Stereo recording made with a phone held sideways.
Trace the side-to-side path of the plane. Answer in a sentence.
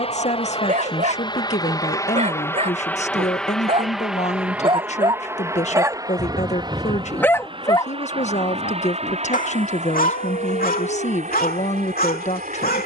You can hear the plane go from the left side to the right.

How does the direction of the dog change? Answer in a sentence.
You can hear the dog travel towards the left.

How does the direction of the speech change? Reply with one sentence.
You can hear the speech stay put.